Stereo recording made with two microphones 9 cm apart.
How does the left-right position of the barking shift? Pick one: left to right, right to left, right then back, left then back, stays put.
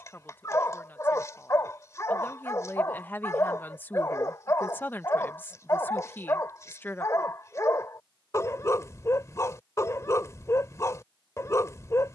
stays put.